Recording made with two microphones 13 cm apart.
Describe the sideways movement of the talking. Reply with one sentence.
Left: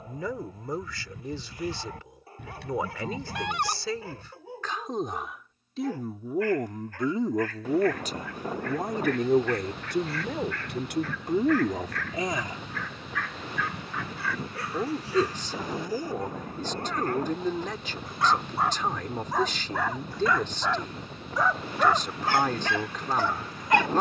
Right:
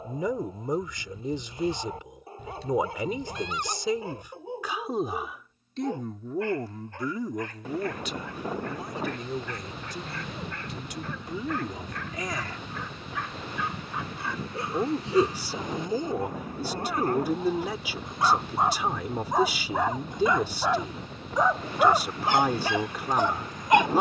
In this clip you hear the talking go left and come back.